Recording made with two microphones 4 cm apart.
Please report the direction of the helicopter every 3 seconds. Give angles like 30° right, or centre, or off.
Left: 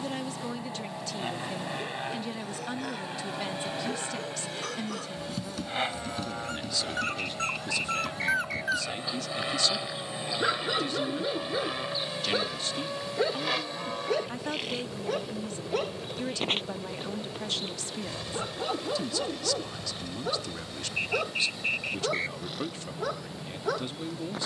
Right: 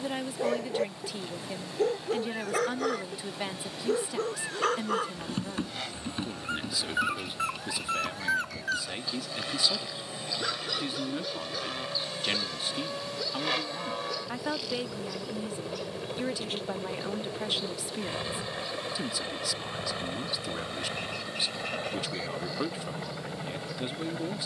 40° left, 40° left, 30° left, 20° left, centre, 10° right, 30° right, 40° right.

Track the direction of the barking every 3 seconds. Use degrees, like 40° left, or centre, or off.
70° right, 40° right, 10° right, 20° left, 40° left, 50° left, 60° left, 60° left.